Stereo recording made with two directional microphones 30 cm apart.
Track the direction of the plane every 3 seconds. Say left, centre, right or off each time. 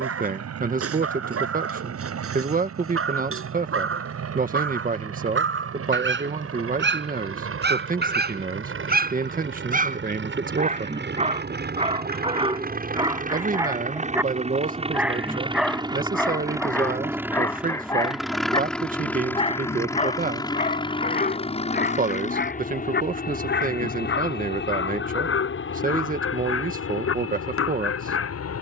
right, right, right, right, right, centre, centre, left, left, left.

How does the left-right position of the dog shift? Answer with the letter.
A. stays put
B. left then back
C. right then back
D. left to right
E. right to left
E.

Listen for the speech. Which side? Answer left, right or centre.
right.